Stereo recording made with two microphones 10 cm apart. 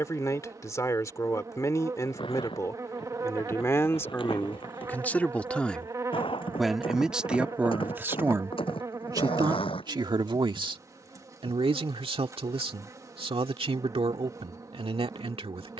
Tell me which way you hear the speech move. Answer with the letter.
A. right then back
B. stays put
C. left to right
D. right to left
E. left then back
C.